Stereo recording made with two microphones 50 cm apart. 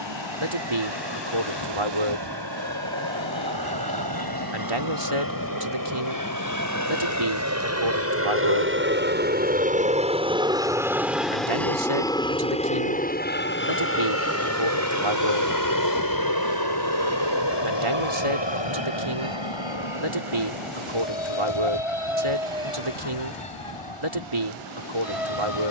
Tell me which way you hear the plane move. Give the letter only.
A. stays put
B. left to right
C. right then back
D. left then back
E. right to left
E.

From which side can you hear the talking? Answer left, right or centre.
right.